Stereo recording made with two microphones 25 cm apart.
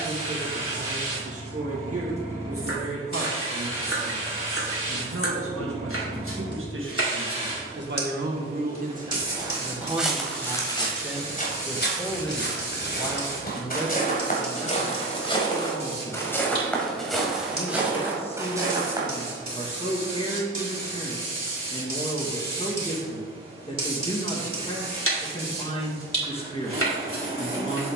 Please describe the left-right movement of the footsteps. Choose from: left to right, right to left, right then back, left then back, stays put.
left then back.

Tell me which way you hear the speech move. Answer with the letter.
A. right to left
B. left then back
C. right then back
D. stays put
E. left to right
A.